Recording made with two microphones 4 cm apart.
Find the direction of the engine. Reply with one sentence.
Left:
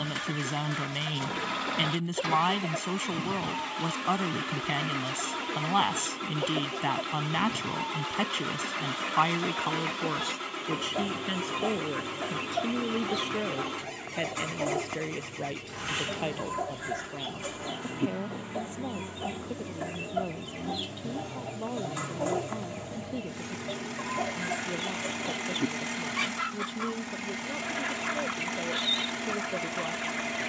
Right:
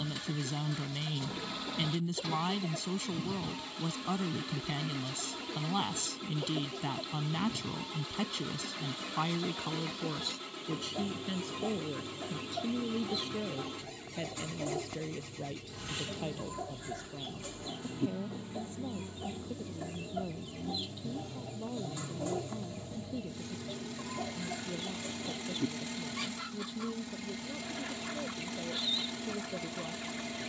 You can hear the engine on the left.